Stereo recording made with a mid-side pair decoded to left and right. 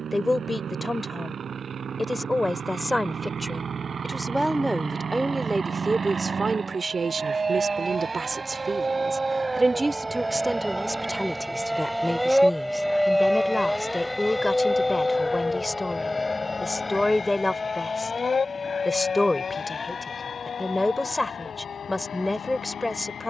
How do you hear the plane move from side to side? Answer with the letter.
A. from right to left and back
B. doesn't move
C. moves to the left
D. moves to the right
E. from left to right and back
C.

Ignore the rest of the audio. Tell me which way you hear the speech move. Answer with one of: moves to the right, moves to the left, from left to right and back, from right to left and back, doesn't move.
from left to right and back.